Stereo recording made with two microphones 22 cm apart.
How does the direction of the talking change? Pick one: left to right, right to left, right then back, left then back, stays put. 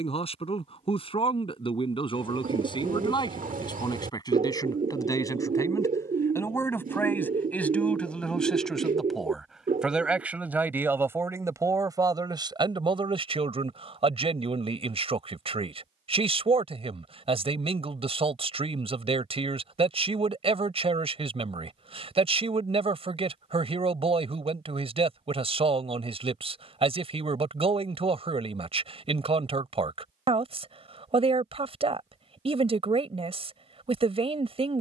left to right.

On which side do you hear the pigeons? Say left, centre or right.
right.